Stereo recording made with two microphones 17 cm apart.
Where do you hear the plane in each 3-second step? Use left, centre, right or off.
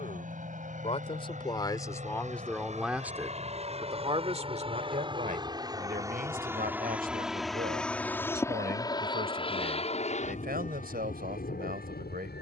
right, right, centre, left.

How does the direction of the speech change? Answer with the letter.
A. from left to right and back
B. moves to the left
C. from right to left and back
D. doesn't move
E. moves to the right
E.